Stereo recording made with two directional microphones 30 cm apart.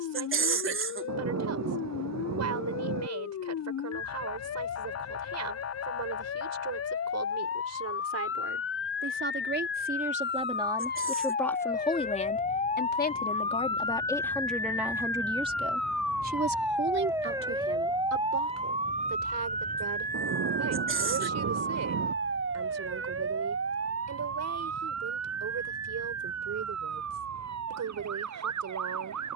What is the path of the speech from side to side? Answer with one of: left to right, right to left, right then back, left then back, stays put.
left then back.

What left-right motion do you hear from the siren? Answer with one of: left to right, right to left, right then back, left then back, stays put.
left to right.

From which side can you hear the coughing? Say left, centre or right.
right.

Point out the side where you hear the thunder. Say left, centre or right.
right.